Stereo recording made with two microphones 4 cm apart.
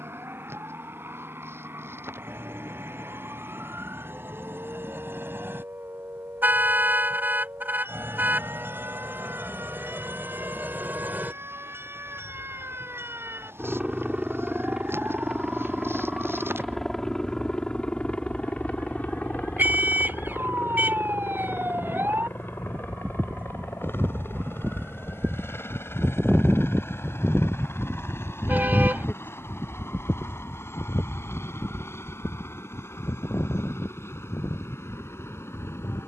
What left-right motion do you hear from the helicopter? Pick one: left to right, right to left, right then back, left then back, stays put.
right to left.